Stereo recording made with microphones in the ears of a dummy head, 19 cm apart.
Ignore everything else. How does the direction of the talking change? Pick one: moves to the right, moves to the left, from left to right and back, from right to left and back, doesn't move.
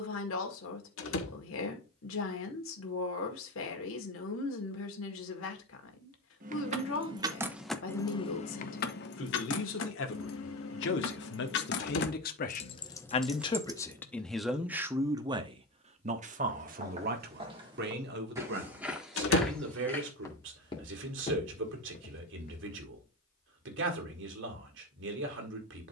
moves to the right.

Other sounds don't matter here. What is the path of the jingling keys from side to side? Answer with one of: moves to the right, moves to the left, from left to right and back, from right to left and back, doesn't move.
from right to left and back.